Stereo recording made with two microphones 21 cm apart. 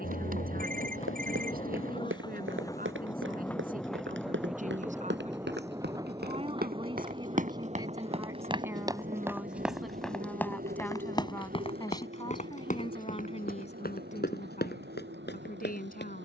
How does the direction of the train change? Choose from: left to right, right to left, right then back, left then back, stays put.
left to right.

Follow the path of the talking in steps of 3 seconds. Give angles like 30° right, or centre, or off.
40° right, 40° right, 20° right, centre, 30° left, 40° left.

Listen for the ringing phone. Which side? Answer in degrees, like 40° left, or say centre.
40° right.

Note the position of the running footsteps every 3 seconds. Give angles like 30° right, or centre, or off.
70° right, 60° right, 30° right, 10° left, 40° left, 50° left.